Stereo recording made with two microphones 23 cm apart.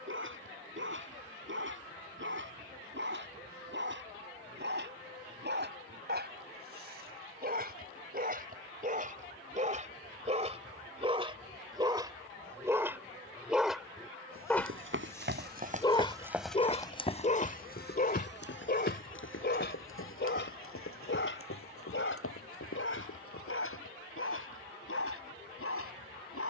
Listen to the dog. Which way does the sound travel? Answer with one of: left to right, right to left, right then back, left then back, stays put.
right to left.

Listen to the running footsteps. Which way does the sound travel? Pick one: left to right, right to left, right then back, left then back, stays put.
right to left.